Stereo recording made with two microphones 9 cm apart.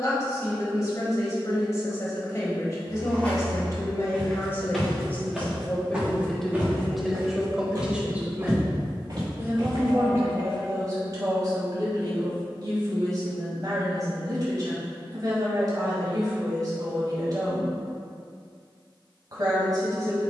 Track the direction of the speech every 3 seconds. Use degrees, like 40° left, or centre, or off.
40° left, 30° left, 10° right, 40° right, 50° right, 50° right, 50° right.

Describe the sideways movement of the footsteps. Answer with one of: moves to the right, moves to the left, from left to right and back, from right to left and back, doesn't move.
moves to the right.